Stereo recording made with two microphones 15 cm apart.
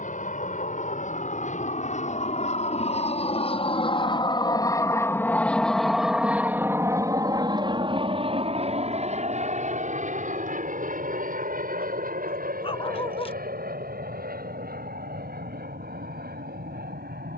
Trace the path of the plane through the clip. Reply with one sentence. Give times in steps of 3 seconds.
In this clip you hear the plane on the left from 0 s and on the right from 6 s.